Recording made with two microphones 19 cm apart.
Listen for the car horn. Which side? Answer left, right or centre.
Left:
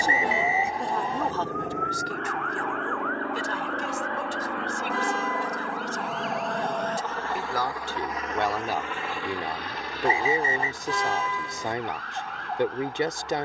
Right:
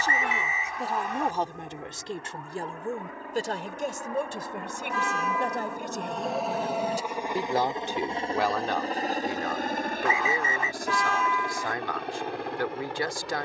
left.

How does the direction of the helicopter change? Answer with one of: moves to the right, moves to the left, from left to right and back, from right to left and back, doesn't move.
moves to the right.